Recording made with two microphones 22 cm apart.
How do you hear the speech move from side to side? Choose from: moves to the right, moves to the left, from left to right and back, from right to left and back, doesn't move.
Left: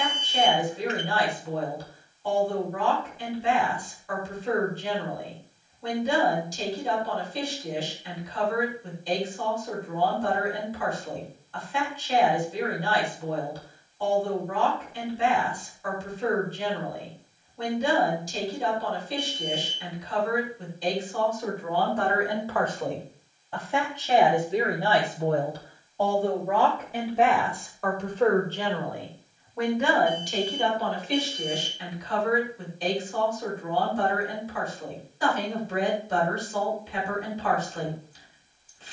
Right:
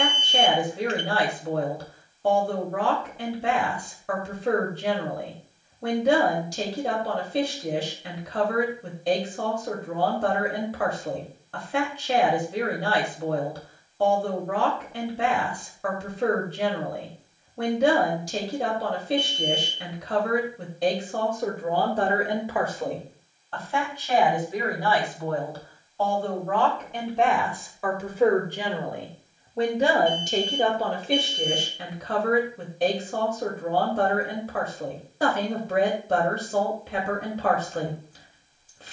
from right to left and back.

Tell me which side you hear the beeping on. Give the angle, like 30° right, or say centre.
30° right.